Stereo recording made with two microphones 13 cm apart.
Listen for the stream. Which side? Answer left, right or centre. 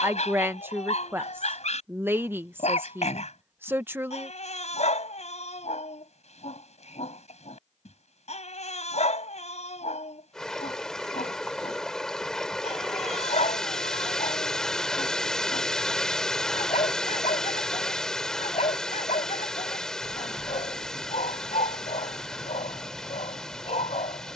centre.